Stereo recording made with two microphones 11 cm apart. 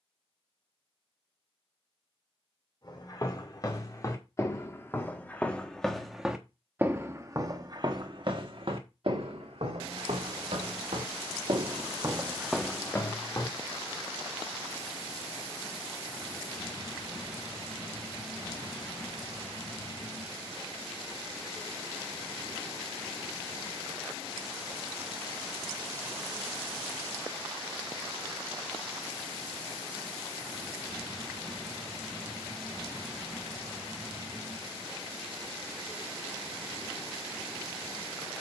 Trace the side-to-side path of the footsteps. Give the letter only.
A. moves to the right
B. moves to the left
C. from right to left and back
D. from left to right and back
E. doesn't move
D.